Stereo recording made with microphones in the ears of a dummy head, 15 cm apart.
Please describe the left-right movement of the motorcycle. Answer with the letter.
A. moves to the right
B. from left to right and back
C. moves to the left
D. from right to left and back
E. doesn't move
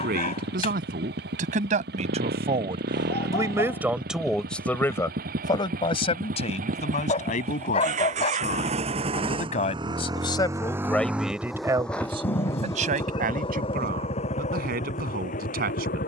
C.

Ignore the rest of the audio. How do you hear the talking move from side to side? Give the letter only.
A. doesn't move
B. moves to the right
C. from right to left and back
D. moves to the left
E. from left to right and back
C.